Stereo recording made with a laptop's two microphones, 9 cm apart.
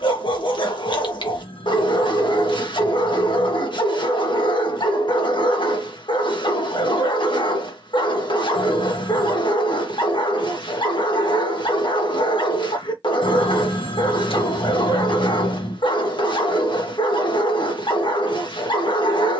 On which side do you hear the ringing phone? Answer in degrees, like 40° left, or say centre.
80° left.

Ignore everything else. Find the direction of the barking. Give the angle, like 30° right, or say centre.
60° left.